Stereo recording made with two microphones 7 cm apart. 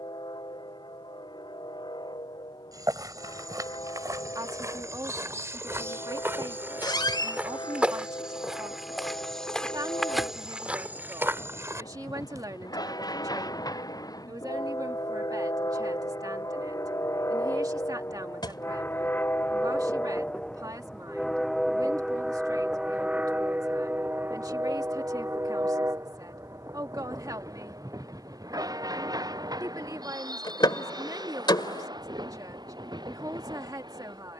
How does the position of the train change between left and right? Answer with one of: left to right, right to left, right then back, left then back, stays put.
left to right.